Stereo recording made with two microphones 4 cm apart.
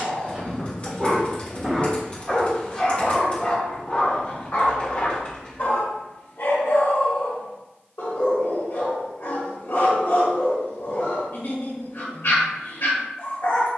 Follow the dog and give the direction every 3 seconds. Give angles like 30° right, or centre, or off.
centre, 40° left, 70° left, 70° left, 70° left.